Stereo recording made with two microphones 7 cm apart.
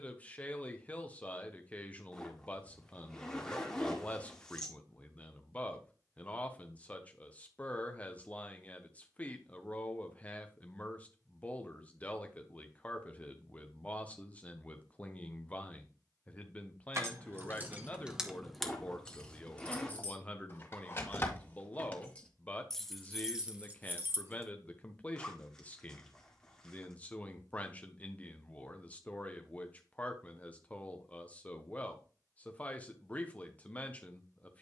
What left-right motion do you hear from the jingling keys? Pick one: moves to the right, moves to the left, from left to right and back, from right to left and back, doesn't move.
from right to left and back.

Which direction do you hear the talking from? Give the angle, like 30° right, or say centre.
20° left.